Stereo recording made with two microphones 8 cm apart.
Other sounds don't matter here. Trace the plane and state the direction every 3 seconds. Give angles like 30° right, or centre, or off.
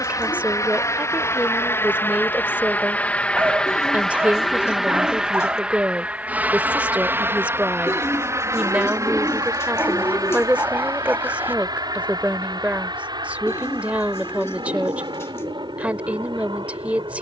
30° left, centre, 30° right, 40° right, 50° right, 60° right.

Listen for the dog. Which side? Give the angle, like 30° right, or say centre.
20° right.